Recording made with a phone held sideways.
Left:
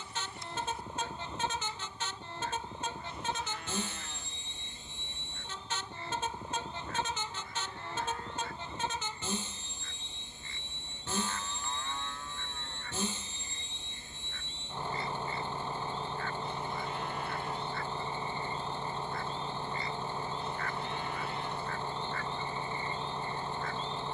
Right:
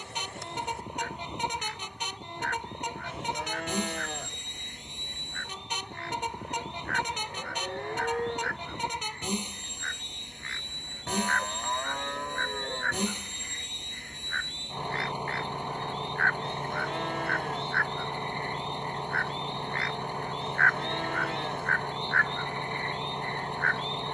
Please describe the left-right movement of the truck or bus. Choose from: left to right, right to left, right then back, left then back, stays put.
stays put.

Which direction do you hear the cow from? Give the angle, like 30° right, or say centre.
70° right.